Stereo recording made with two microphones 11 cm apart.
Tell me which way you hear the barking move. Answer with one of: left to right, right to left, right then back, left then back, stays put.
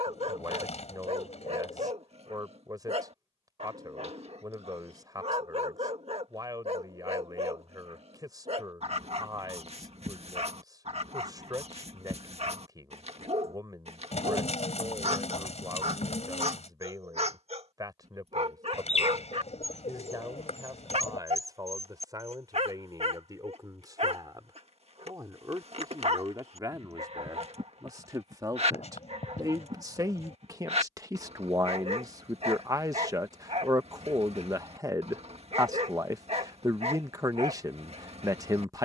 stays put.